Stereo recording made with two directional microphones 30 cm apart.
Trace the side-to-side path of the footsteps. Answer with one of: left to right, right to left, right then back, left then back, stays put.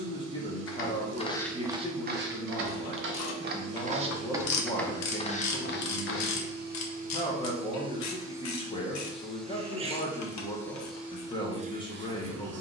right then back.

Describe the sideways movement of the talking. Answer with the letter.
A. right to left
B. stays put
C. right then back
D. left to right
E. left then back
B.